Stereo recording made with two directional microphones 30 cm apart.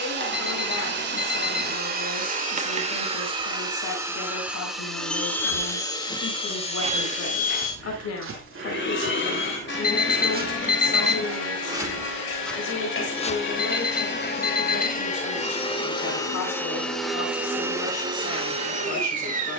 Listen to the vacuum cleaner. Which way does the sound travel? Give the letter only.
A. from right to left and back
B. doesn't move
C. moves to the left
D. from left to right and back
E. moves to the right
A.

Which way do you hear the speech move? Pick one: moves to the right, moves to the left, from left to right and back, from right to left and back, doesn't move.
doesn't move.